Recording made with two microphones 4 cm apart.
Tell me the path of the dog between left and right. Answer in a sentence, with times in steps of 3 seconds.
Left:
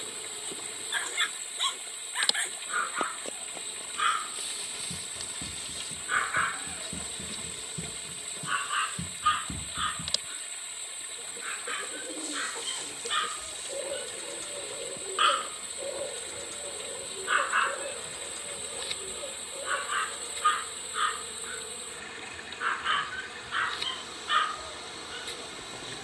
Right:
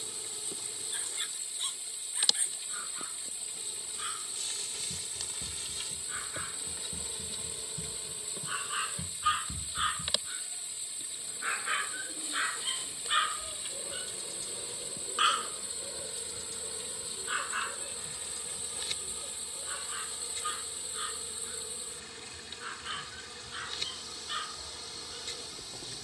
You can hear the dog on the left from 0 s, in the centre from 9 s and on the left from 15 s.